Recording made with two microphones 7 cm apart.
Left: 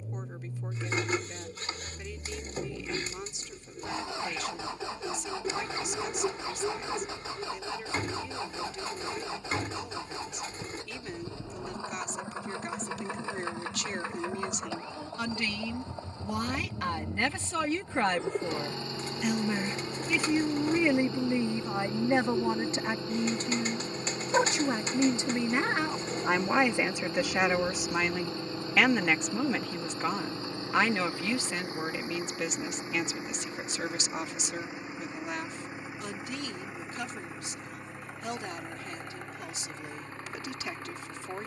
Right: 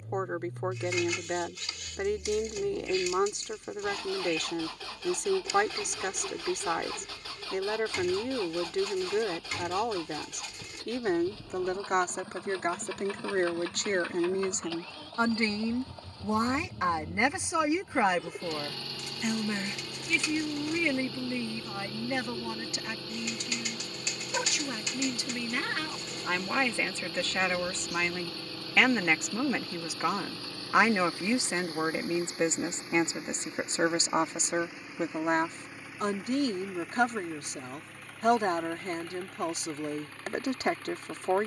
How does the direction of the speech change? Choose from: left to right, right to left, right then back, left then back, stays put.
left then back.